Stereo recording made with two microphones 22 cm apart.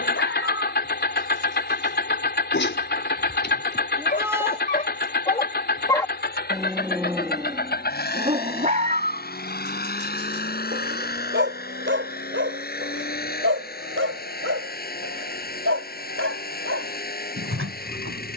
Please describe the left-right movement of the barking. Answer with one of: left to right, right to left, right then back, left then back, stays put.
left to right.